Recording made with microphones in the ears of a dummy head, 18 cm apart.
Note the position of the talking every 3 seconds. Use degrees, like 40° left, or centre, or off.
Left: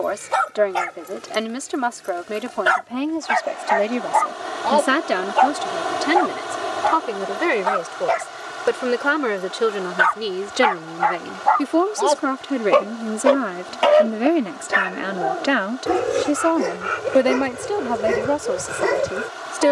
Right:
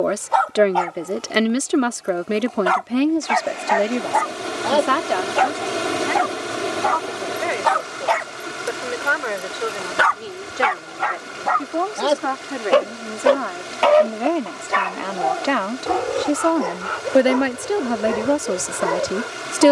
30° right, 10° left, 60° left, 50° left, 30° left, centre, 30° right.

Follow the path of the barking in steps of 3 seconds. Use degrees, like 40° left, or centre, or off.
20° left, 10° right, 60° right, 50° right, centre, 30° left, 30° left.